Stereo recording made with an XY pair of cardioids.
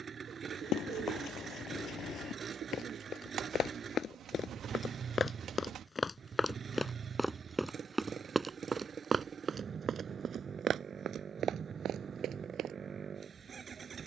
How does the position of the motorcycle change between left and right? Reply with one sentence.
You can hear the motorcycle stay put.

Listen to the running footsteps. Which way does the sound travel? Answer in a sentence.
In this clip you hear the running footsteps travel towards the right.